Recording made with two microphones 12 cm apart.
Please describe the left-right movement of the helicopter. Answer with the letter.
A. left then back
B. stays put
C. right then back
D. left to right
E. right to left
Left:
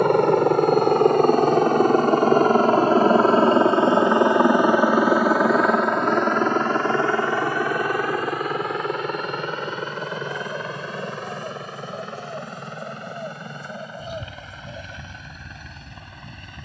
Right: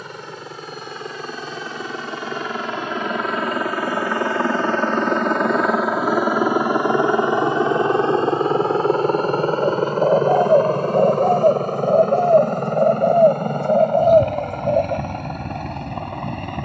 D.